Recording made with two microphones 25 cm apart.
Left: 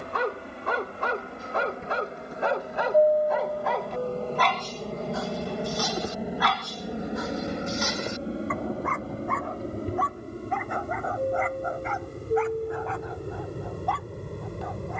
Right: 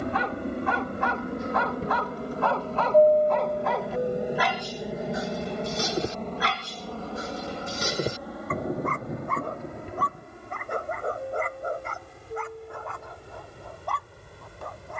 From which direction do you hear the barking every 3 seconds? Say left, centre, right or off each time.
left, centre, right, right, right.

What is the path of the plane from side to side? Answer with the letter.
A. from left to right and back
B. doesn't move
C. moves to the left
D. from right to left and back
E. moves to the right
C.